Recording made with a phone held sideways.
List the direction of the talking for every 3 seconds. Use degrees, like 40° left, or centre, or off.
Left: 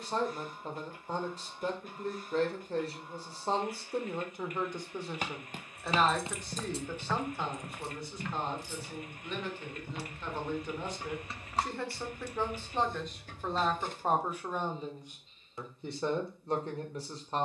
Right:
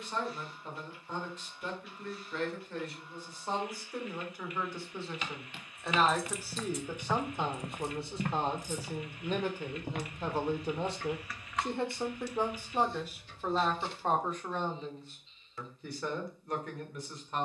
40° left, 20° left, 20° right, 30° right, centre, 30° left.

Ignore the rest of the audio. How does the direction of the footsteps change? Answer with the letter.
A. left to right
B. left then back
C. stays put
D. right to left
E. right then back
A.